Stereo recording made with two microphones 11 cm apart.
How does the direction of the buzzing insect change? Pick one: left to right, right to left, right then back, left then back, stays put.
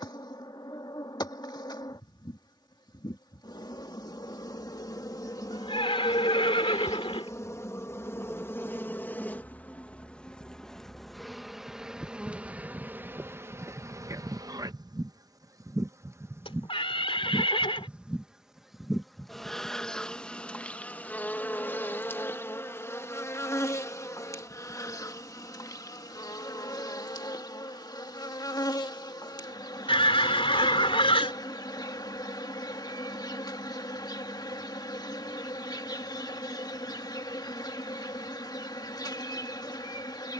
right then back.